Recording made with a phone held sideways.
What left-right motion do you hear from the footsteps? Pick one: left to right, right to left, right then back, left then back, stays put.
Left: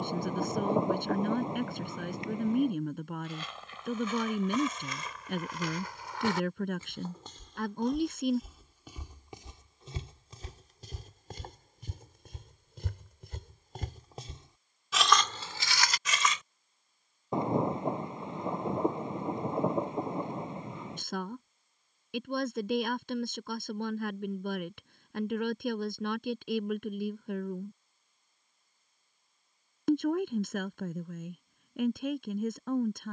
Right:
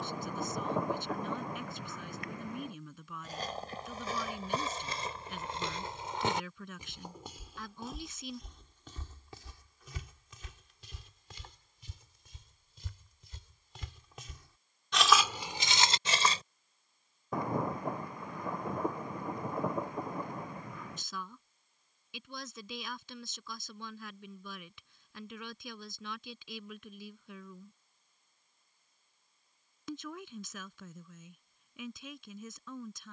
left then back.